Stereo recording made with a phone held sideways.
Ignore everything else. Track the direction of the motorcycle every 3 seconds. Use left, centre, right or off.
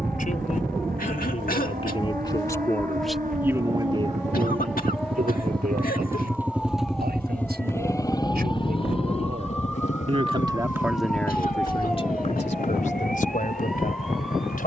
right, right, centre, left, left.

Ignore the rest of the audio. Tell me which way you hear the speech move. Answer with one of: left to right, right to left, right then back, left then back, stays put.
right then back.